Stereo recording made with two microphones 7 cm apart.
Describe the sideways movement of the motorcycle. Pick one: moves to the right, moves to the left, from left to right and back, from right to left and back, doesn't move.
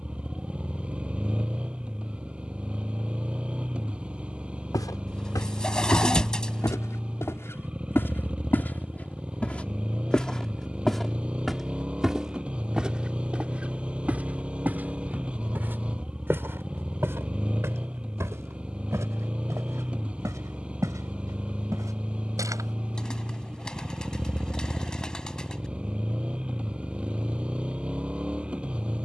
doesn't move.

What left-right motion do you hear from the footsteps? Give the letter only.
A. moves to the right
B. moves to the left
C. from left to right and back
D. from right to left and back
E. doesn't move
A.